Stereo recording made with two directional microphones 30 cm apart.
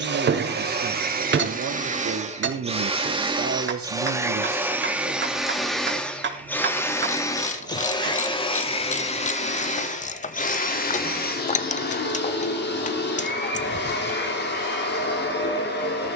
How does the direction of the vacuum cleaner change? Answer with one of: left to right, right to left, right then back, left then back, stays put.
right to left.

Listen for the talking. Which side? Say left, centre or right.
right.